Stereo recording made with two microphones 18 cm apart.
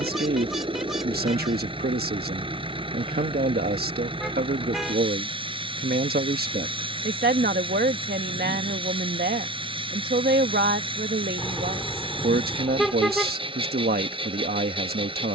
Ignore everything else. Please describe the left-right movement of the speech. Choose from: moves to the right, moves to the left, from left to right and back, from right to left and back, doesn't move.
doesn't move.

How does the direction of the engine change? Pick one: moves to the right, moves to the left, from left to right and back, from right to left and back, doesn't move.
doesn't move.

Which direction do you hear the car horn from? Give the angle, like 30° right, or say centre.
centre.